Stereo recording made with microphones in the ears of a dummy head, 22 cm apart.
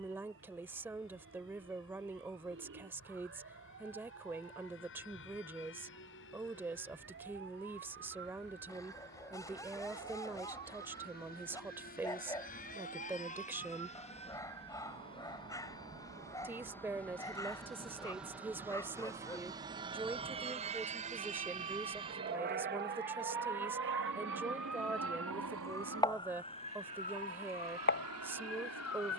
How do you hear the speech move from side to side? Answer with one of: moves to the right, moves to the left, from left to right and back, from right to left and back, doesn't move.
doesn't move.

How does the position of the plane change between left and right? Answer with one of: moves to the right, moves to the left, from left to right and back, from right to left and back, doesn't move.
moves to the right.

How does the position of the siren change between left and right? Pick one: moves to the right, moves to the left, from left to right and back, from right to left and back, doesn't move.
moves to the left.